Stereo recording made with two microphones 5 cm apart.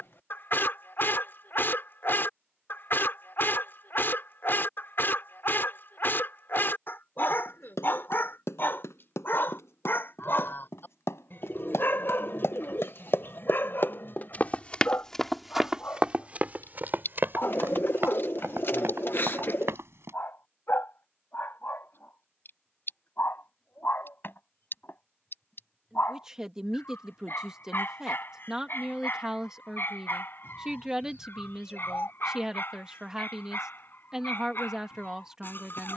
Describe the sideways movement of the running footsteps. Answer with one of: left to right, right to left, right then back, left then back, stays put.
left to right.